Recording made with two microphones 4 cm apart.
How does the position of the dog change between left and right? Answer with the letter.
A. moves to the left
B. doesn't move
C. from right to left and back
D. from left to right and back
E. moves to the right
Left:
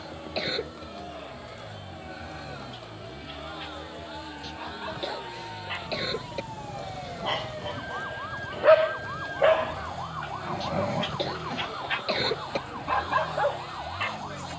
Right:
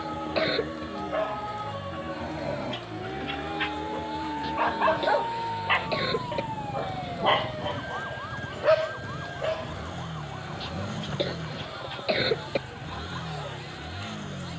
A.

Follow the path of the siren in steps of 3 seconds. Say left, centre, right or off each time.
right, right, centre, left, left.